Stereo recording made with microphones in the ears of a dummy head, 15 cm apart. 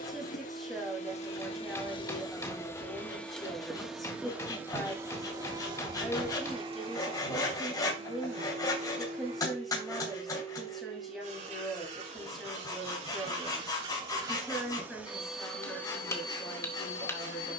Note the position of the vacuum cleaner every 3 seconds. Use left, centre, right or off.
left, centre, right, right, right, left.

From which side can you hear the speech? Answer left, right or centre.
centre.